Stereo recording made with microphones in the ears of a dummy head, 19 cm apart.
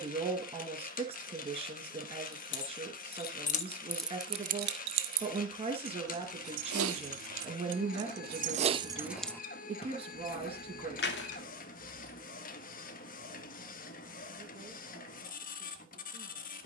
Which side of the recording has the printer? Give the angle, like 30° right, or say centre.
40° left.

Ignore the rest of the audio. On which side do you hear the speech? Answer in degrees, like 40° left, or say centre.
30° right.